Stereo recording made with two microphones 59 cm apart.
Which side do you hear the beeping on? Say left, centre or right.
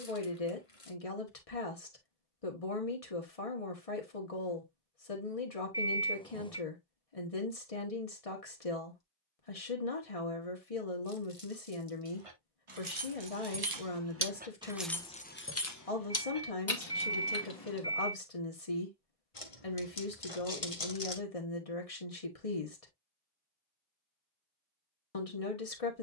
centre.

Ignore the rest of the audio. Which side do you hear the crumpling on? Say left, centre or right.
left.